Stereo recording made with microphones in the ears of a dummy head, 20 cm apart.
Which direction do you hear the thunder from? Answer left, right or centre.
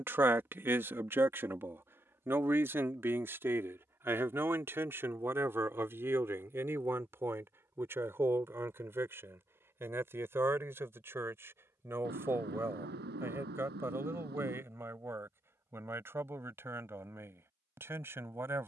right.